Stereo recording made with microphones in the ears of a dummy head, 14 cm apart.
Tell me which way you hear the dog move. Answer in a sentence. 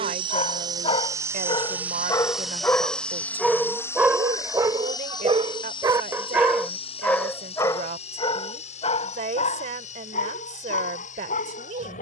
In this clip you hear the dog move from left to right and back again.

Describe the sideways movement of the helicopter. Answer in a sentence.
In this clip you hear the helicopter travel towards the left.